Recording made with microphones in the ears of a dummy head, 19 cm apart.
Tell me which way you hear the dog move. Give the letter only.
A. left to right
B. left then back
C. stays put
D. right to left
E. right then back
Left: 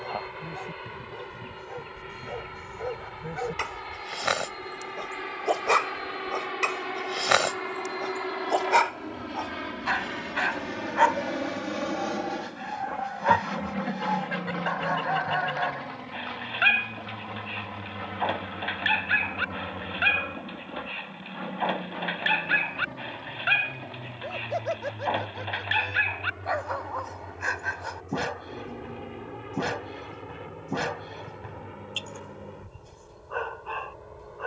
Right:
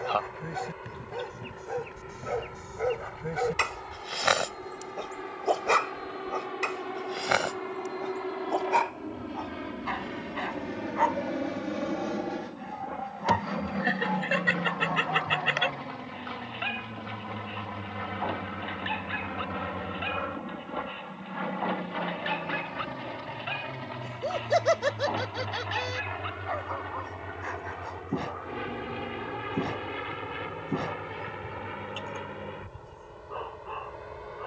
D.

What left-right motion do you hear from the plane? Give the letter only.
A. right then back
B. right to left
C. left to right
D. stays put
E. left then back
C.